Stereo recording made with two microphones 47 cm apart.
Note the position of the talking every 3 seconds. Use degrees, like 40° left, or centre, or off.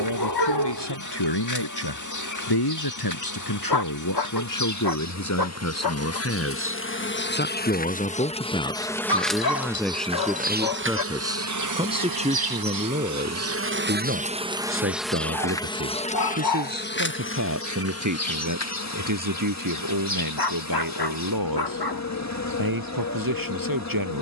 60° left, 40° left, 20° left, centre, 20° right, 30° right, 40° right, 50° right.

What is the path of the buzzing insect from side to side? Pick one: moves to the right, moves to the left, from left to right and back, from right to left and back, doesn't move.
from left to right and back.